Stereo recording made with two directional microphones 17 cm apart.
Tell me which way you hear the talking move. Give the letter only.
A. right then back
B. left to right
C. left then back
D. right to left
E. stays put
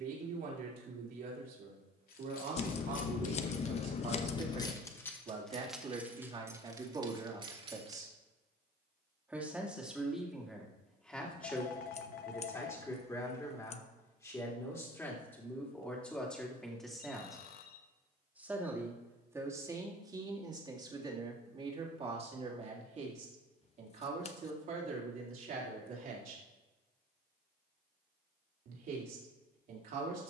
C.